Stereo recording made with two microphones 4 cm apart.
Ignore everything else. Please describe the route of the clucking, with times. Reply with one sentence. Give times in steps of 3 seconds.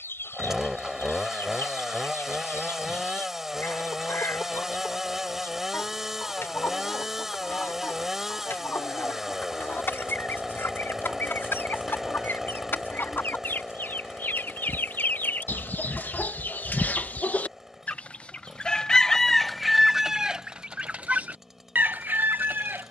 In this clip you hear the clucking on the left from 0 s, in the centre from 18 s and on the right from 21 s.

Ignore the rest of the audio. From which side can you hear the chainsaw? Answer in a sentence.
You can hear the chainsaw in the centre.